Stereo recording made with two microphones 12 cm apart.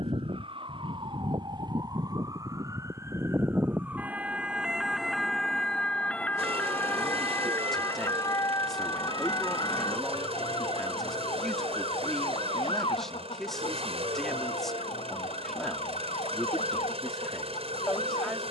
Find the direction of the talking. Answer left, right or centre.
centre.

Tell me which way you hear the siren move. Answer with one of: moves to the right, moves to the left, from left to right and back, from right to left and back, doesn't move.
moves to the left.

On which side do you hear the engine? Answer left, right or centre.
right.